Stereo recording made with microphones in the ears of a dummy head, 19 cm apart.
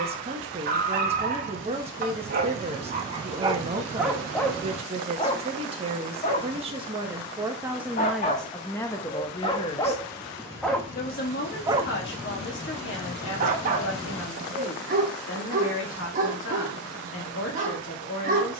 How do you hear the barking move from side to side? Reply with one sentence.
You can hear the barking go left and come back.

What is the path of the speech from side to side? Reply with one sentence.
In this clip you hear the speech move from right to left.